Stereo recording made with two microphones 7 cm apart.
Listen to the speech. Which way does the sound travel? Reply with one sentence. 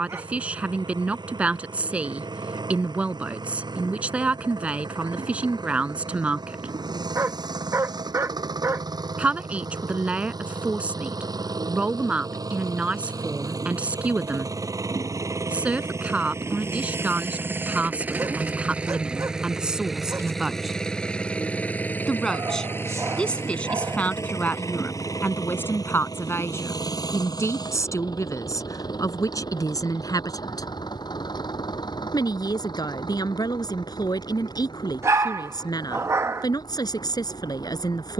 In this clip you hear the speech go from the right side to the left.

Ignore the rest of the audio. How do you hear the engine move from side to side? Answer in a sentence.
In this clip you hear the engine travel towards the left.